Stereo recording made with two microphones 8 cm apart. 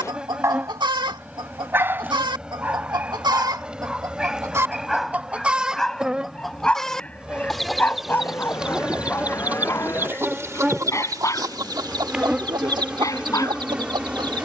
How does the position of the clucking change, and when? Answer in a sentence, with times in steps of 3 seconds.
You can hear the clucking on the right from 0 s, in the centre from 6 s and on the right from 9 s.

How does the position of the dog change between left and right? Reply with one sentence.
In this clip you hear the dog travel towards the left.